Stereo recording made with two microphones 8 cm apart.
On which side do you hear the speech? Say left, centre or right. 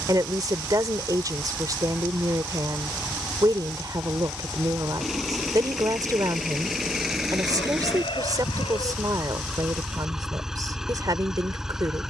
right.